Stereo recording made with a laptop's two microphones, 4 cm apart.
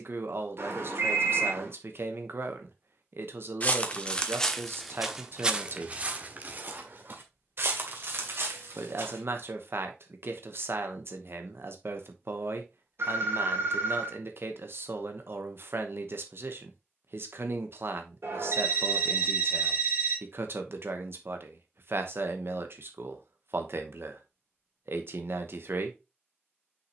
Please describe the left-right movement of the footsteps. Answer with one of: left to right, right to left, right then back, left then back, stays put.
left to right.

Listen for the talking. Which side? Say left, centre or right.
right.